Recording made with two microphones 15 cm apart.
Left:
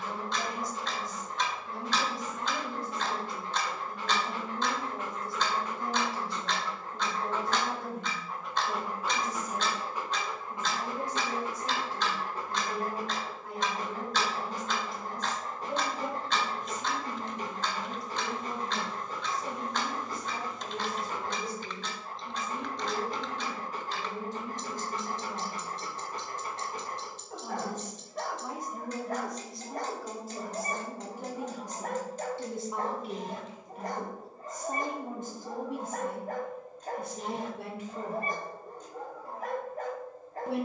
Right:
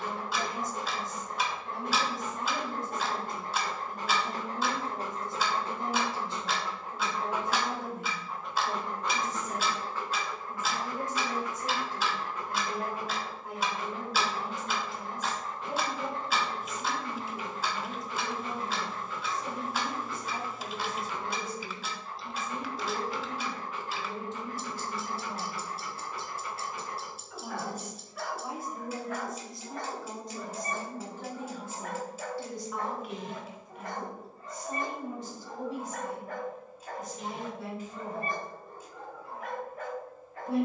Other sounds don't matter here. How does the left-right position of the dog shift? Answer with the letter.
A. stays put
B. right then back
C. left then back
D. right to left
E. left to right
D.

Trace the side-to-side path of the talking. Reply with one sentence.
You can hear the talking move from right to left.